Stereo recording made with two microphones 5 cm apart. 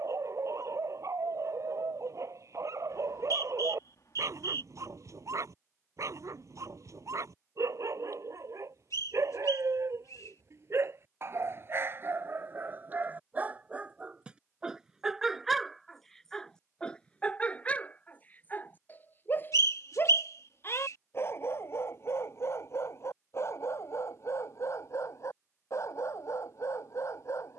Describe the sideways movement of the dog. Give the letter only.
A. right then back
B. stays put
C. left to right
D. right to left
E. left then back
D.